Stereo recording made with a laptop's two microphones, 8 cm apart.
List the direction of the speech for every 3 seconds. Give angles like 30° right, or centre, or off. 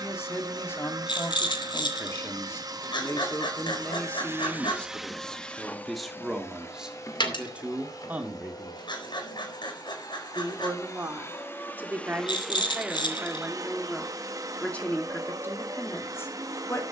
30° left, 20° left, 10° right, 30° right, 10° right, 30° left.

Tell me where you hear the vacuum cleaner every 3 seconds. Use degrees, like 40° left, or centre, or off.
50° right, 20° right, 40° left, 40° left, 30° right, 40° right.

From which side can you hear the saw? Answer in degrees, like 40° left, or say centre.
60° left.